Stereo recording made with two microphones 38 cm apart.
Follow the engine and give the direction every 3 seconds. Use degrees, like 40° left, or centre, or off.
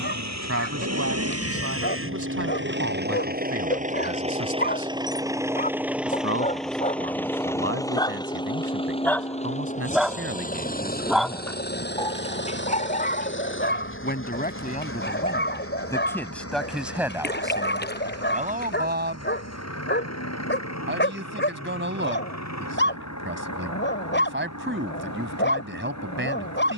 40° right, 20° right, 10° left, 20° left, 30° left, 40° left, 40° left, 50° left, 50° left.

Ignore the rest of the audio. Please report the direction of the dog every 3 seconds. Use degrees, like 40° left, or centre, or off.
30° left, 30° left, 20° left, centre, 30° left, 30° left, 30° left, 30° left, 30° left.